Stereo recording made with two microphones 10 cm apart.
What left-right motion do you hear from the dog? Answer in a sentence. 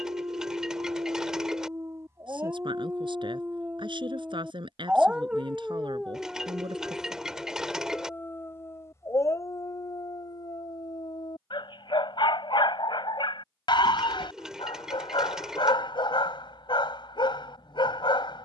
In this clip you hear the dog go from the right side to the left.